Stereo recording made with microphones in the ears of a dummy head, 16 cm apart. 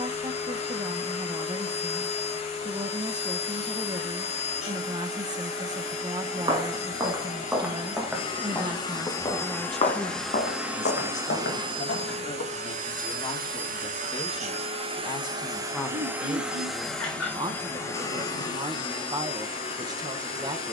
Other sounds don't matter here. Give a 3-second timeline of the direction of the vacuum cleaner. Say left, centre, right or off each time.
left, left, left, centre, right, centre, left.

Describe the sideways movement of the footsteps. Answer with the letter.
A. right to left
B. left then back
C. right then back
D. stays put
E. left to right
A.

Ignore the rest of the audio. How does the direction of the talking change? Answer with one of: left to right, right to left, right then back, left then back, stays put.
left then back.